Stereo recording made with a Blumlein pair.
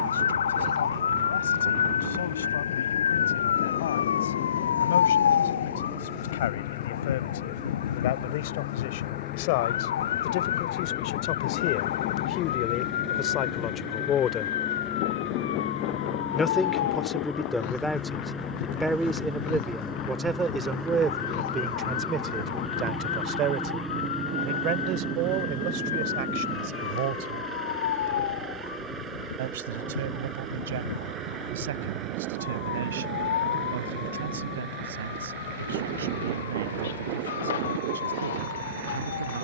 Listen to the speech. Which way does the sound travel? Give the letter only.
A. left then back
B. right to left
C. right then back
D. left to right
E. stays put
D.